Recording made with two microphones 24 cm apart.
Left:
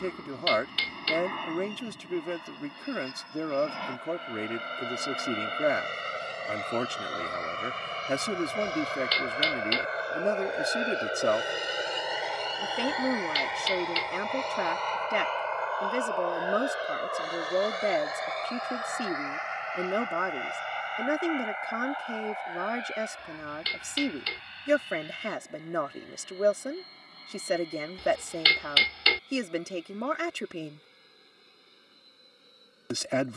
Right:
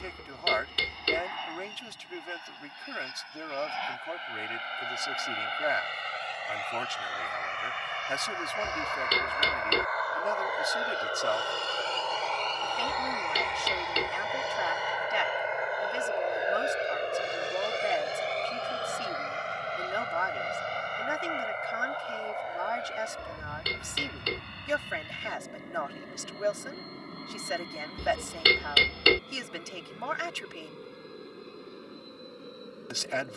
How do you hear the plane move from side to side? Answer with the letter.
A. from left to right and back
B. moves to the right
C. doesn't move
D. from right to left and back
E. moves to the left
B.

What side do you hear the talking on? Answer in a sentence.
You can hear the talking on the left.